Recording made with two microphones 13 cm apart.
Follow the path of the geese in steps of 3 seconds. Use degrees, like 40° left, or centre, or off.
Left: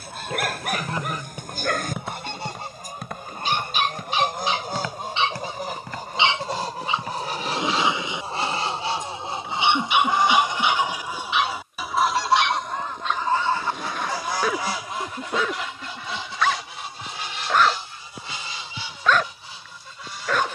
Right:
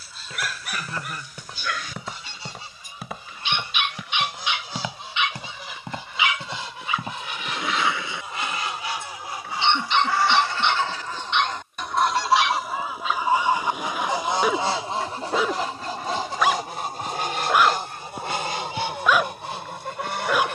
60° left, 50° left, 40° left, 20° left, 10° right, 40° right, 60° right.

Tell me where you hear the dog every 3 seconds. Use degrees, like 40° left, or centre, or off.
50° left, 40° left, 20° left, 10° left, 10° right, 10° right, 10° right.